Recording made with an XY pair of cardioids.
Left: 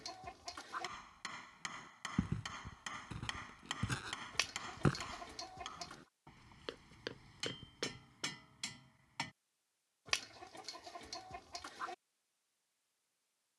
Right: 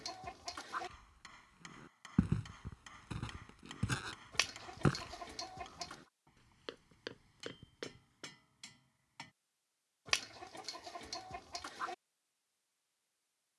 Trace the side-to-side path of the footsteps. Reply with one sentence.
In this clip you hear the footsteps move from right to left.